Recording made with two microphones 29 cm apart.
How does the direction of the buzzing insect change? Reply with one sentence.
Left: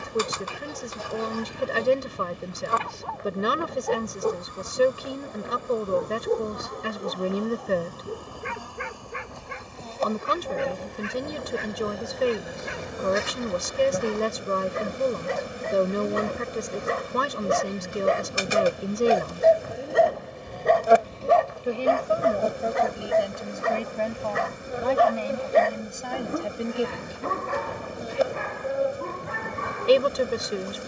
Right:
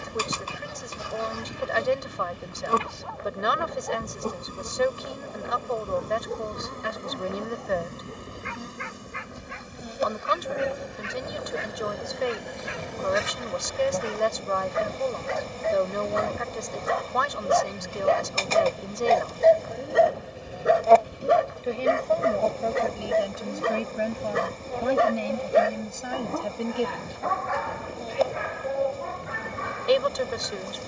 In this clip you hear the buzzing insect travel towards the left.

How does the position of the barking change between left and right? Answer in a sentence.
In this clip you hear the barking go right and come back.